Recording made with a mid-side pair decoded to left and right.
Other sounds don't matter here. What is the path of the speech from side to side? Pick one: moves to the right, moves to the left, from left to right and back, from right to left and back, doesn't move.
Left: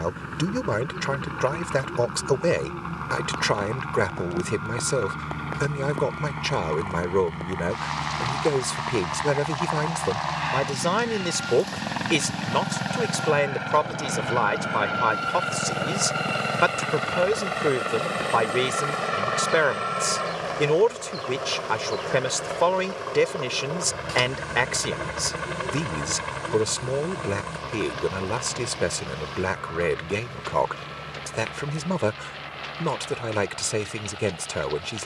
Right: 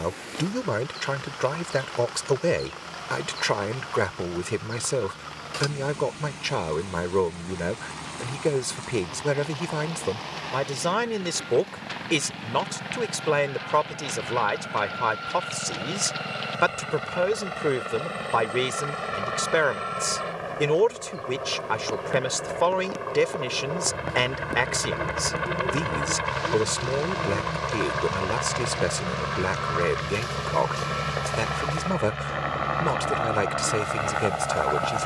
doesn't move.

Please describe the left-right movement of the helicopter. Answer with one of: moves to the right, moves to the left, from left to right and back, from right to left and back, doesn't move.
moves to the right.